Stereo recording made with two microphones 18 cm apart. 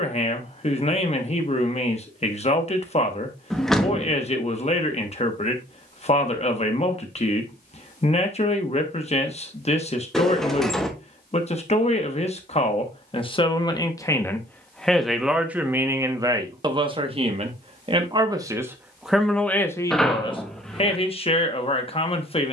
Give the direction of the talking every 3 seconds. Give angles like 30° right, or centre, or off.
40° left, 40° left, 40° left, 40° left, 30° left, 20° right, centre, 30° left.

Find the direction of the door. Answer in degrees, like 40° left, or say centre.
centre.